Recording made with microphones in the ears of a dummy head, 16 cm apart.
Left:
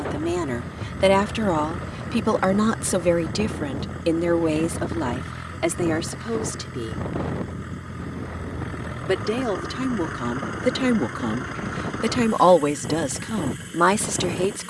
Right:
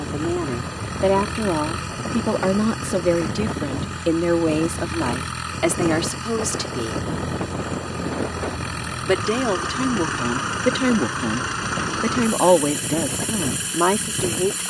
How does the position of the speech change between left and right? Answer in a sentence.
In this clip you hear the speech go right and come back.